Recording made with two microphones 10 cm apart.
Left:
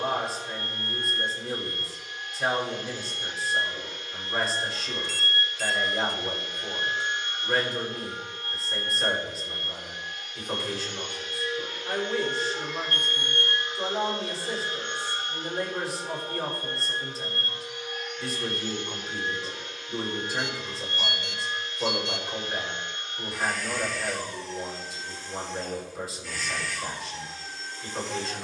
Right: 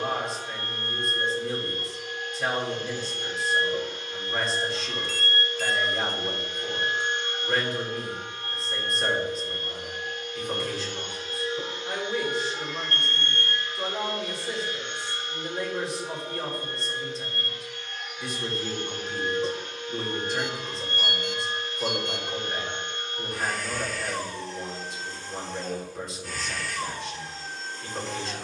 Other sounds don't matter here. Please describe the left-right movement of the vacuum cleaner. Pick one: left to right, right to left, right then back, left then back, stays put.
left then back.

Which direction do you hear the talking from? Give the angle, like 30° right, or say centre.
centre.